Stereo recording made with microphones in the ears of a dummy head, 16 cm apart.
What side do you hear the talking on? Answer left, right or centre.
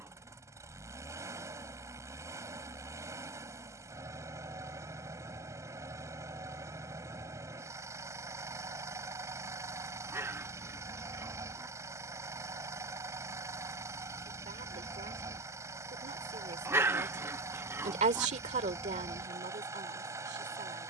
right.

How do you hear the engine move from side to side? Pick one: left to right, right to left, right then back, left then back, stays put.
stays put.